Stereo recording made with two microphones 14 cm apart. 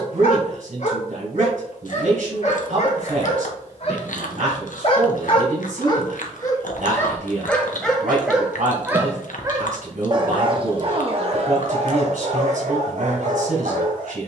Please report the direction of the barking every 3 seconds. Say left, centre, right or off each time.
left, left, centre, right, right.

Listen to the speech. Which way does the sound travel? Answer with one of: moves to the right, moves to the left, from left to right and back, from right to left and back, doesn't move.
doesn't move.